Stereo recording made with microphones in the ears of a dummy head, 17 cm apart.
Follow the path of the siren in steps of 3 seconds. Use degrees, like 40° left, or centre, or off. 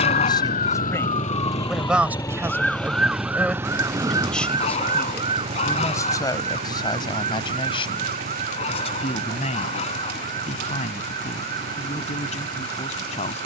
20° left, 20° right, 40° right, 50° right, 50° right.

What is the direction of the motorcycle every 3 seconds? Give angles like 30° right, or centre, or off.
30° left, 20° right, 40° right, 50° right, 60° right.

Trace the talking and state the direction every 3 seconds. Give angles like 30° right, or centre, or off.
centre, 10° left, 30° left, 40° left, 40° left.